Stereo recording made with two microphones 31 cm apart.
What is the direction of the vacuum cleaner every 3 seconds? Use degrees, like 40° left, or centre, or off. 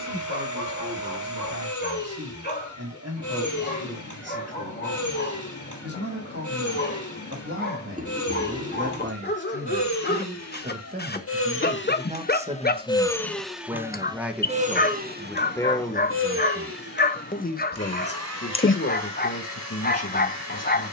70° left, 70° left, 70° left, 50° left, centre, 40° right, 60° right.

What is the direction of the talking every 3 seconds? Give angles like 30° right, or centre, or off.
60° right, 50° right, 40° right, 30° right, 10° right, 20° left, 50° left.